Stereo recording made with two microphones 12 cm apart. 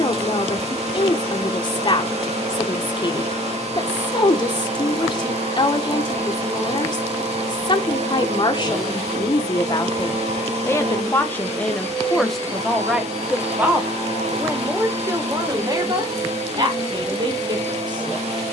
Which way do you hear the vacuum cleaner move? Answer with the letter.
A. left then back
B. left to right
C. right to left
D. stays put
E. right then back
D.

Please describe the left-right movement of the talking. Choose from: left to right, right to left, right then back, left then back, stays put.
left to right.